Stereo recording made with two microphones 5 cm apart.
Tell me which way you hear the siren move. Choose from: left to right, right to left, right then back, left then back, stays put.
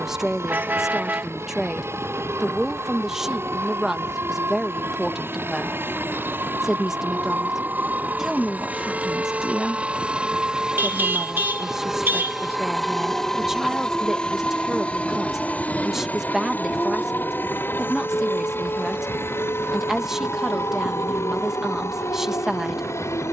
right to left.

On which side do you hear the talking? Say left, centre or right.
centre.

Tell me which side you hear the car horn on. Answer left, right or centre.
right.